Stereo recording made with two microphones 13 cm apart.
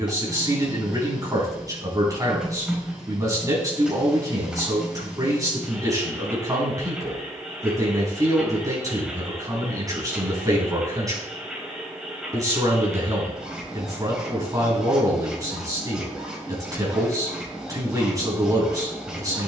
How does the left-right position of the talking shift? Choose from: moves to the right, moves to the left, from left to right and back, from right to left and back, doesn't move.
doesn't move.